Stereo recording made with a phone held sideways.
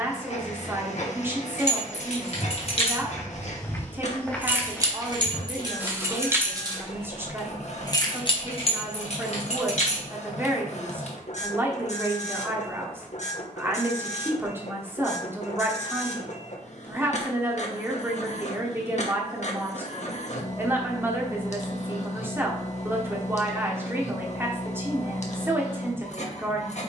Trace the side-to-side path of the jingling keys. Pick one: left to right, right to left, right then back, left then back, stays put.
right then back.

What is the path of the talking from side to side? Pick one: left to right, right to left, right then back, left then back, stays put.
stays put.